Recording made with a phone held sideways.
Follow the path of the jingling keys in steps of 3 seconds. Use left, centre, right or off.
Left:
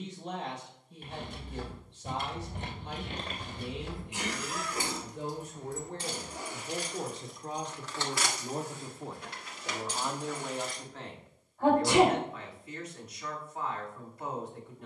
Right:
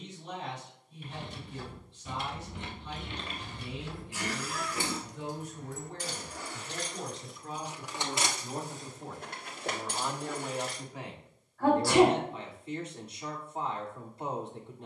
left, left, centre, right, off.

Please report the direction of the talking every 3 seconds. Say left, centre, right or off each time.
left, left, left, centre, right.